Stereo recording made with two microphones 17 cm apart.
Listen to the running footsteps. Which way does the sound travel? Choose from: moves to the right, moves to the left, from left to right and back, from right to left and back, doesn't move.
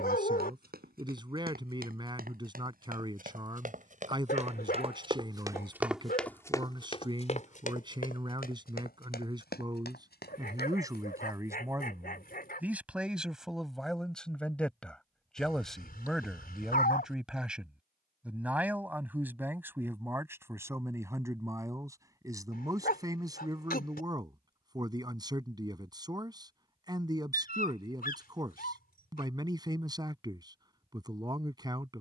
moves to the left.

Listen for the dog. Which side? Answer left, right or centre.
left.